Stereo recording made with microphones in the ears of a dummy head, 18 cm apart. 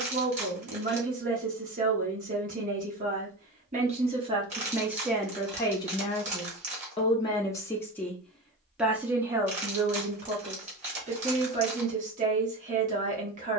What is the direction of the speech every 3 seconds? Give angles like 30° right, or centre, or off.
40° right, 10° right, 20° left, 30° right, 40° right.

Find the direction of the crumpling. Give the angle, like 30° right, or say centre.
30° right.